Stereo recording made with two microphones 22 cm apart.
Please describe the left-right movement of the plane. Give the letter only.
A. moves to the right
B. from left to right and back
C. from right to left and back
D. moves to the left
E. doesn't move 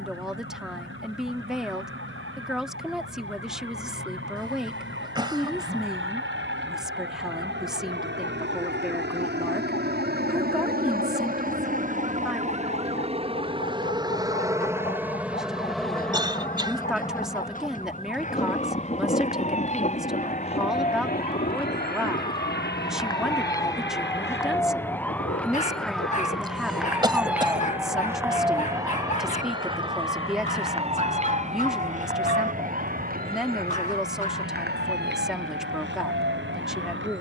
D.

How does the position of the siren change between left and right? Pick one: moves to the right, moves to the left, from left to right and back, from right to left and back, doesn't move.
moves to the right.